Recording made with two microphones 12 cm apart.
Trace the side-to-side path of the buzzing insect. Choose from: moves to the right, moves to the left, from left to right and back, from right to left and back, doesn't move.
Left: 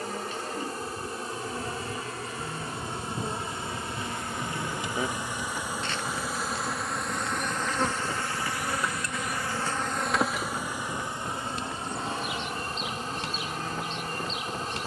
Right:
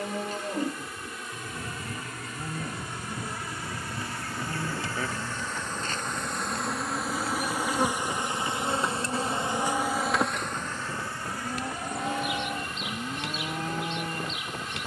from left to right and back.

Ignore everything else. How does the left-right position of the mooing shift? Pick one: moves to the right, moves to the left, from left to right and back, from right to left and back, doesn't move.
doesn't move.